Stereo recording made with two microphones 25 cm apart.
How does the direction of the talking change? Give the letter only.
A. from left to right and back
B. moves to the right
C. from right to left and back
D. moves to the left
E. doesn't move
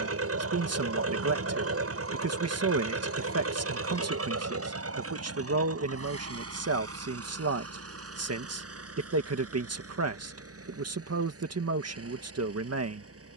E.